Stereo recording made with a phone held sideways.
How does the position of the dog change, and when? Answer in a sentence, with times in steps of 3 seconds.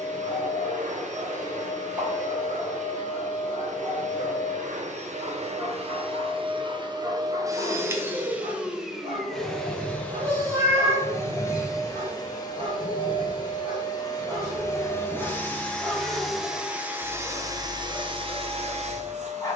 You can hear the dog on the right from 0 s, in the centre from 15 s and on the left from 18 s.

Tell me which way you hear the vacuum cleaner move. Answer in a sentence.
You can hear the vacuum cleaner move from right to left and back again.